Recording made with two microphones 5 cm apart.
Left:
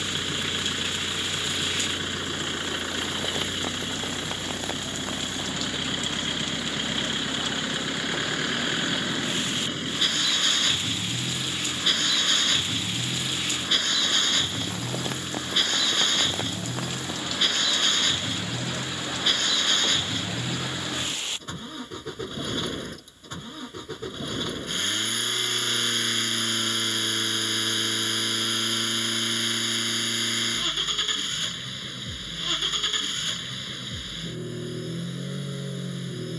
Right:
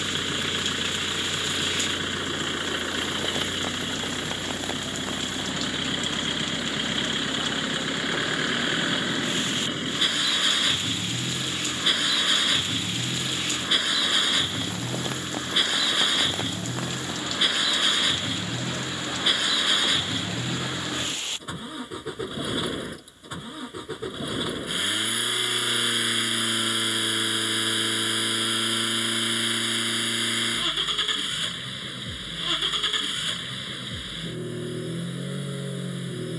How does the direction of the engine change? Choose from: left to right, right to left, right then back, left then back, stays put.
stays put.